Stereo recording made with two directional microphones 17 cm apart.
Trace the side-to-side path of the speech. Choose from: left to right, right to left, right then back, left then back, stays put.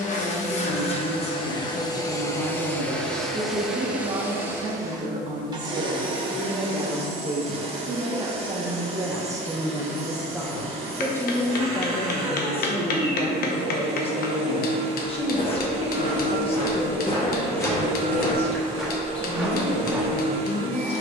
right then back.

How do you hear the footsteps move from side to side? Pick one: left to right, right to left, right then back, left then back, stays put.
left to right.